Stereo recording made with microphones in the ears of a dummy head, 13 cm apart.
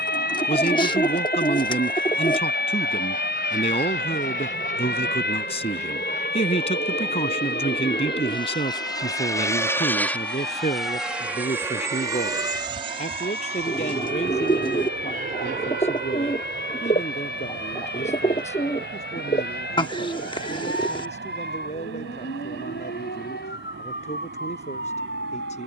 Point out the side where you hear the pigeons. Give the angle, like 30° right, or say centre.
30° left.